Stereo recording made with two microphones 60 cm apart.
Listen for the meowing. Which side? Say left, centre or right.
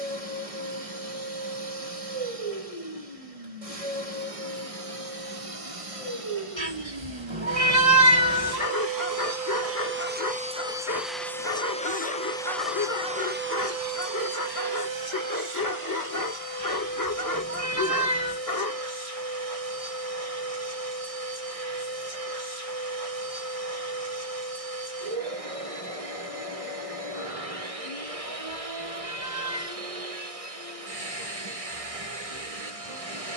right.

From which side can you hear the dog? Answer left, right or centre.
left.